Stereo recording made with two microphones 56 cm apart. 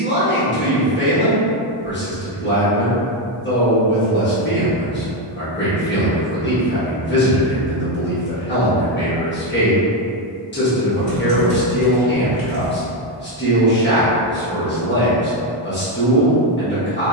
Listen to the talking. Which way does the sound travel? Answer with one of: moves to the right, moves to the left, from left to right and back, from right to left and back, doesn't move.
doesn't move.